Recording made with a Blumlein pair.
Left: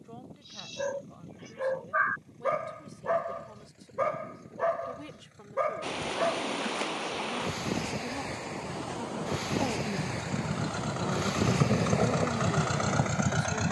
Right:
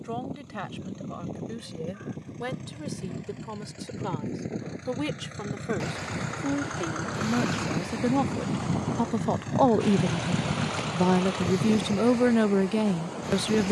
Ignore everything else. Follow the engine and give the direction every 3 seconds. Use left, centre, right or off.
right, right, right, centre, left.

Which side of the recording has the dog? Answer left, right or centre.
left.